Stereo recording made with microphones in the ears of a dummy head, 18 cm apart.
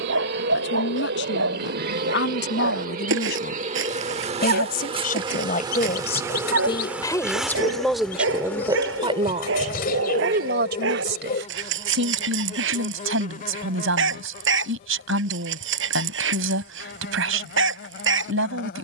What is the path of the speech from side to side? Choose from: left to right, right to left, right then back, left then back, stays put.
left to right.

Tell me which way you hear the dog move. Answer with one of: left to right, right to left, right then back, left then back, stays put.
stays put.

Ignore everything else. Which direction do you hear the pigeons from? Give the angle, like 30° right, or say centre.
50° left.